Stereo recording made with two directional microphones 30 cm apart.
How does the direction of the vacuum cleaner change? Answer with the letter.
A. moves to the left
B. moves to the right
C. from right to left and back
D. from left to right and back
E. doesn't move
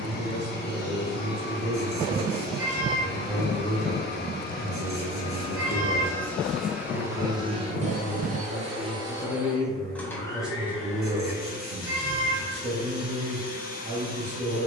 D.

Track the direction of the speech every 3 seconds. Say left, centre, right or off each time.
right, centre, left, centre, right.